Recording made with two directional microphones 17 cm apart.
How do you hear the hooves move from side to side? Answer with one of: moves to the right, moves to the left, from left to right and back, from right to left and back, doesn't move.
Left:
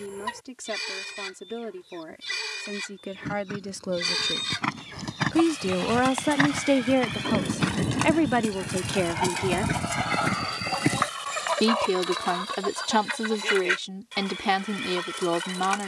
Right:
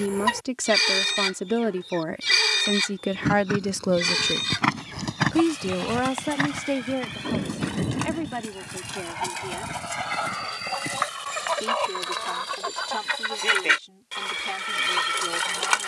moves to the left.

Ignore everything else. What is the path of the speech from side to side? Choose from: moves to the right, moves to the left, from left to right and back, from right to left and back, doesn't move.
moves to the left.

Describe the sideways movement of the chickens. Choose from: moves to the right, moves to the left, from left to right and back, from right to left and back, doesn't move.
from right to left and back.